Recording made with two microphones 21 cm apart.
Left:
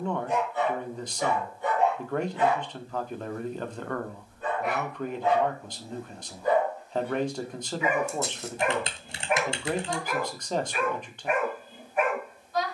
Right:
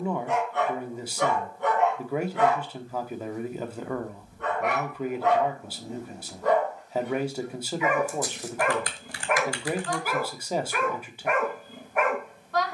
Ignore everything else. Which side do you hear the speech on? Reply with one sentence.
You can hear the speech in the centre.